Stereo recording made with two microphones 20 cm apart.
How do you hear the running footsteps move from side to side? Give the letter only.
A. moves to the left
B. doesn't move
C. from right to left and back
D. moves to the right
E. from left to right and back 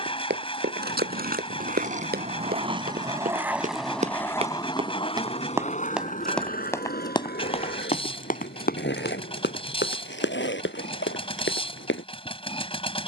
A.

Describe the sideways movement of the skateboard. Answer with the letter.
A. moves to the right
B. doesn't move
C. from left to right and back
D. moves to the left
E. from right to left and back
D.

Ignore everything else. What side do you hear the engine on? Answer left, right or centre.
left.